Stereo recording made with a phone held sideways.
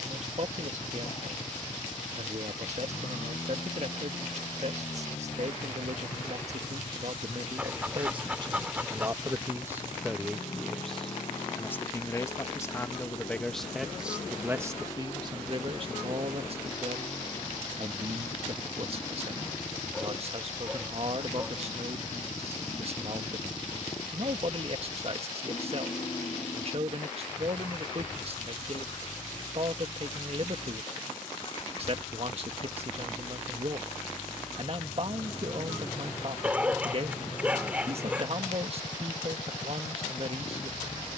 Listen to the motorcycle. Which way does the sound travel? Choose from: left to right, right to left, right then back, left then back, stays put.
stays put.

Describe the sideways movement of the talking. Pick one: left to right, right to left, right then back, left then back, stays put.
left then back.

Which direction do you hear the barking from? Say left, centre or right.
centre.